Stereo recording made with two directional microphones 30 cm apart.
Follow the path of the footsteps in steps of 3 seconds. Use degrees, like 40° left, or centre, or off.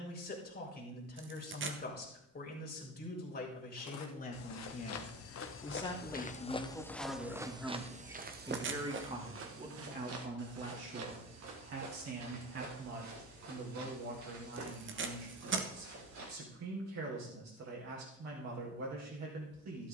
off, 50° left, 10° right, 50° right, 60° right, 70° right, off.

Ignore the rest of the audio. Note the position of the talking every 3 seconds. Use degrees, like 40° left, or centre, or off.
30° left, 30° left, centre, 40° right, 60° right, 60° right, 60° right.